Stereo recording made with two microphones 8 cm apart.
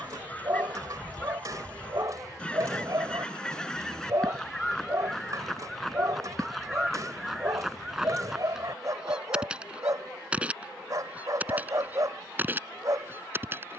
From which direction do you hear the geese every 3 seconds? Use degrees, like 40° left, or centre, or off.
20° left, 10° left, centre, 10° right, 20° right.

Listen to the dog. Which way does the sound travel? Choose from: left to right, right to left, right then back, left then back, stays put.
stays put.